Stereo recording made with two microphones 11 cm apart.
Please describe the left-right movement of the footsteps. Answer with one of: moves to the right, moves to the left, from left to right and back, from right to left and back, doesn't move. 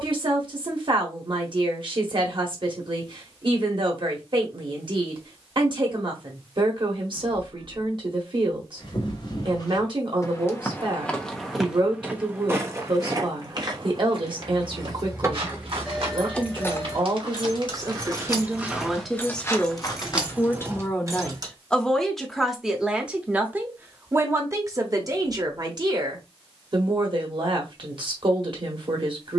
from left to right and back.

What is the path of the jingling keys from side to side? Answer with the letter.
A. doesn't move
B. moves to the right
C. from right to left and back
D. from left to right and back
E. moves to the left
C.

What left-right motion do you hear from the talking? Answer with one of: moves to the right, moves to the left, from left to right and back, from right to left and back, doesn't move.
from right to left and back.